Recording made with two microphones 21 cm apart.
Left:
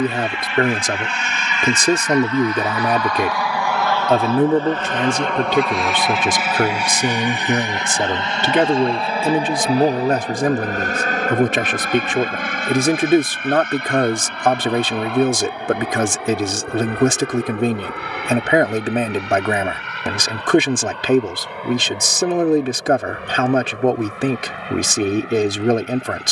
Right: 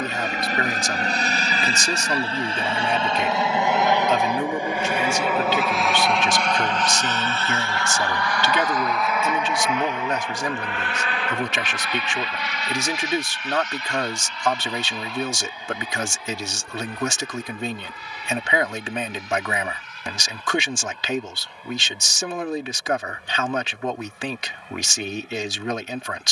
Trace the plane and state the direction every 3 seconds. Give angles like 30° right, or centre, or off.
40° right, 10° right, 20° left, 40° left, 50° left, 60° left, 70° left, 70° left, 70° left.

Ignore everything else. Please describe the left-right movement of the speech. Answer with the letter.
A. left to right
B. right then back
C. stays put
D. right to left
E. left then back
C.